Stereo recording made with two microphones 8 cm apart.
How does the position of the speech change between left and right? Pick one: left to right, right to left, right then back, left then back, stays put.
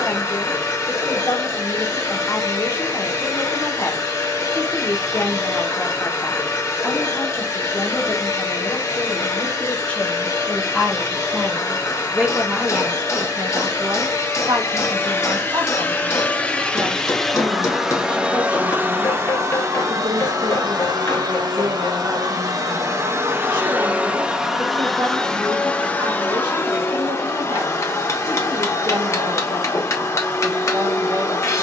left to right.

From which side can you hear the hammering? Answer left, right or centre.
left.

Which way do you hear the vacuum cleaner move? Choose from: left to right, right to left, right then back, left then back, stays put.
right then back.